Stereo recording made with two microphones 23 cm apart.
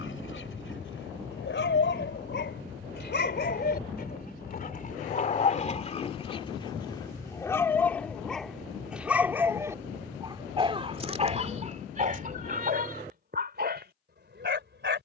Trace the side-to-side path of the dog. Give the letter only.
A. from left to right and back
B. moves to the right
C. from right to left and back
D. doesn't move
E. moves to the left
B.